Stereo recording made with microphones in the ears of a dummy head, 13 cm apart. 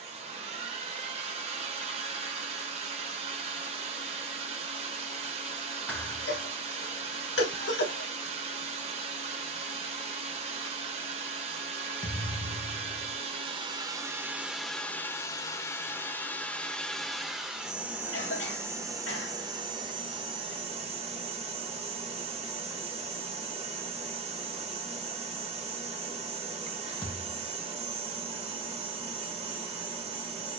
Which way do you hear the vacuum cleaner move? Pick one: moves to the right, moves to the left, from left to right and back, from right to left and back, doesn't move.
from right to left and back.